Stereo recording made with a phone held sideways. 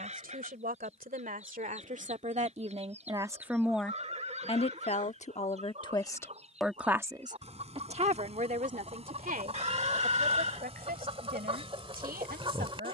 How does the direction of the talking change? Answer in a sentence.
In this clip you hear the talking move from right to left and back again.